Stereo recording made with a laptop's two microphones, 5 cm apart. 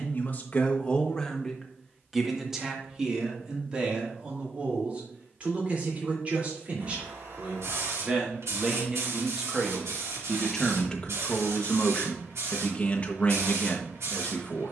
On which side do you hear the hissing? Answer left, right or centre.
right.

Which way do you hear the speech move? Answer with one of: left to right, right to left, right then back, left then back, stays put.
right then back.